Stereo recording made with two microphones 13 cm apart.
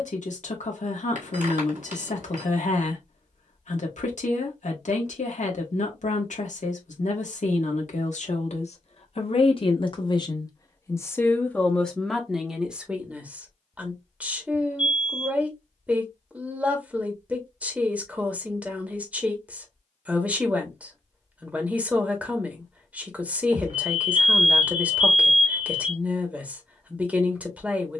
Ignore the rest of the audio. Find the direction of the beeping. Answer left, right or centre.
right.